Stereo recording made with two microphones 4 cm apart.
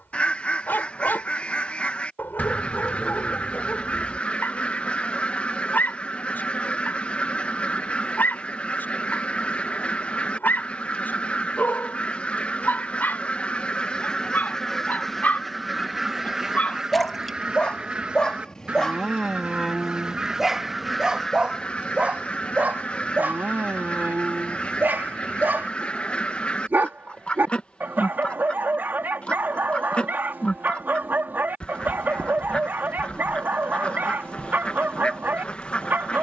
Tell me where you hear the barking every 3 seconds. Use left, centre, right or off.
left, left, left, left, left, left, centre, right, right, right, right, right.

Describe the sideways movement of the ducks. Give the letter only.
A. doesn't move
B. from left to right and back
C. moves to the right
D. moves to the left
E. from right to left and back
B.